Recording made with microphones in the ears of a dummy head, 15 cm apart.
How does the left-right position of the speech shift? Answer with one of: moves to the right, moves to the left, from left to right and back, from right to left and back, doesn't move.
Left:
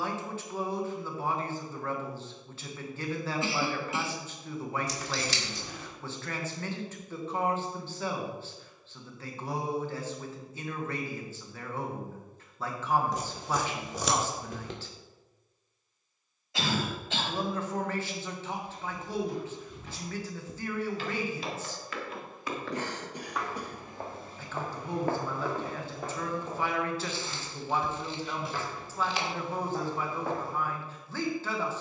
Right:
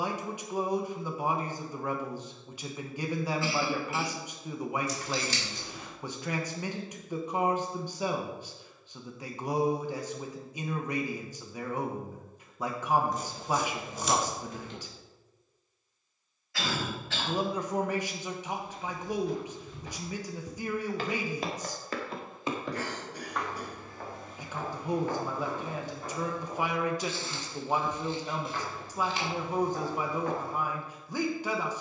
doesn't move.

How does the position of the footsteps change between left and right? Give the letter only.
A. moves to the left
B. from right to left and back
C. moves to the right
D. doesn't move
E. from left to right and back
A.